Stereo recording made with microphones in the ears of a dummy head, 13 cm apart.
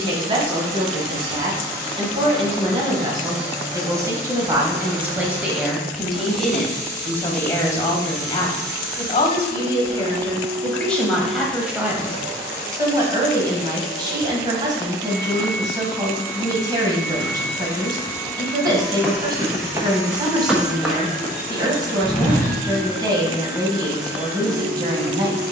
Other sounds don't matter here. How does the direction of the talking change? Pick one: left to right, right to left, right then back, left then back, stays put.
left then back.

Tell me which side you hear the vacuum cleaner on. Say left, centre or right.
right.